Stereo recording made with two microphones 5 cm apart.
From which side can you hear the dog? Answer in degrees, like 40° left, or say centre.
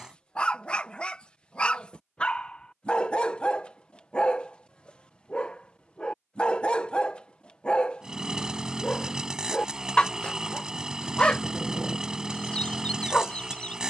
20° left.